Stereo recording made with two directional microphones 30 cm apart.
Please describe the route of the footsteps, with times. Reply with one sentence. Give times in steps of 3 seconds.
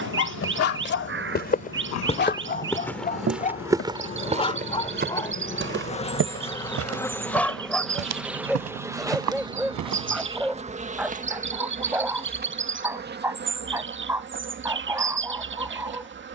In this clip you hear the footsteps on the left from 0 s, on the right from 3 s and not at all from 12 s.